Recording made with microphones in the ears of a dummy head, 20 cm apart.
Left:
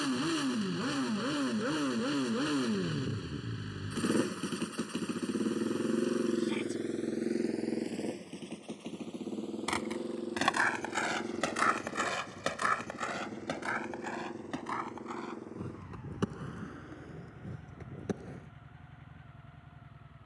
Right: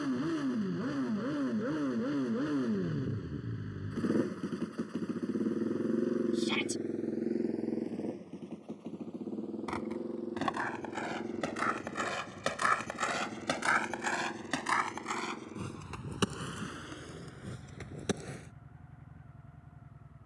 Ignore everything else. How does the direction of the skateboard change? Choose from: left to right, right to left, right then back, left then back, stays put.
left to right.